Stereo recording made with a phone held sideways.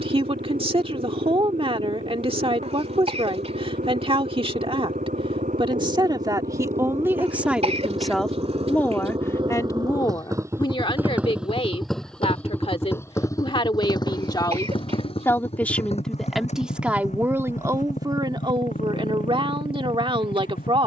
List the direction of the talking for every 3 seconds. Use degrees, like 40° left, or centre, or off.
40° right, 40° right, 10° right, 30° left, 40° left, 10° right, 40° right.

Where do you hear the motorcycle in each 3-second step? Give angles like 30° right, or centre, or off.
70° right, 70° right, 50° right, 20° right, 20° left, 50° left, 60° left.